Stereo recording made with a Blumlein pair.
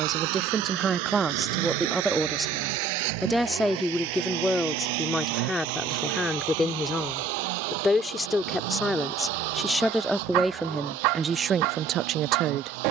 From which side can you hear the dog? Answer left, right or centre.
right.